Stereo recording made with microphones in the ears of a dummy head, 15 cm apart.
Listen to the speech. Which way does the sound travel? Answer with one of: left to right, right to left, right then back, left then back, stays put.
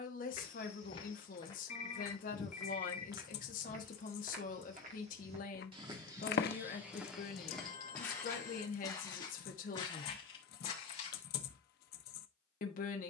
stays put.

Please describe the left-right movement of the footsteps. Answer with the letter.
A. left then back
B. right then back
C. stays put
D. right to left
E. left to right
B.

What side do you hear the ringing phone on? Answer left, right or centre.
left.